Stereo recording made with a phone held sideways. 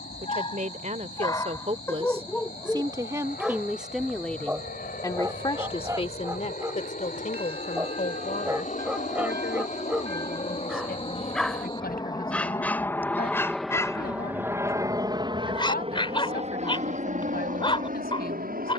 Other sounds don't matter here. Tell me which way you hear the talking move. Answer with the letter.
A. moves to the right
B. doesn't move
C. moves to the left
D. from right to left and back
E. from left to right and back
C.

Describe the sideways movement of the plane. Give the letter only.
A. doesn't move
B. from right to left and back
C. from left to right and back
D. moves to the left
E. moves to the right
E.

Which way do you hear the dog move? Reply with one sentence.
You can hear the dog go right and come back.